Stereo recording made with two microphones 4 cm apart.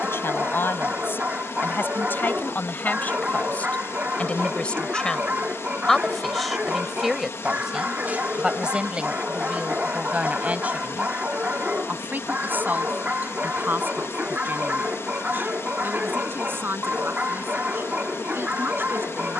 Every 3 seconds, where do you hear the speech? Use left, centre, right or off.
left, left, centre, right, right, right, right.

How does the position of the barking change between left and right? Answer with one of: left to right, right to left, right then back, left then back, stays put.
stays put.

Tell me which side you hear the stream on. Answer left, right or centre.
left.